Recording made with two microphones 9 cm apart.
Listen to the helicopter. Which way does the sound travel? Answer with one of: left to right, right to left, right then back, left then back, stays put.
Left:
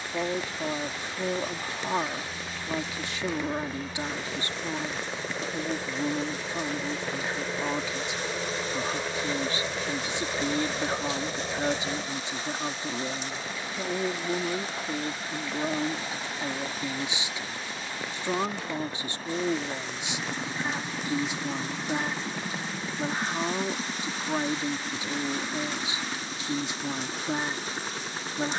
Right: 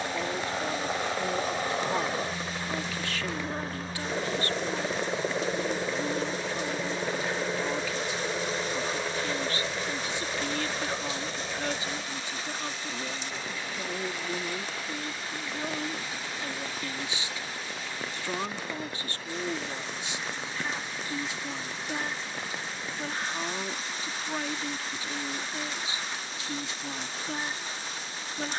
right to left.